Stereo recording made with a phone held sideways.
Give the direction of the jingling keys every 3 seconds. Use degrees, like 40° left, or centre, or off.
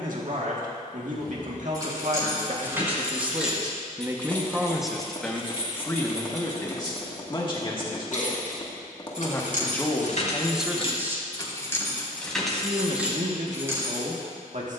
20° right, 20° left, 70° left, 50° left, 10° right.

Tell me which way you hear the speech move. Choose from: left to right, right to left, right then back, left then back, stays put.
left then back.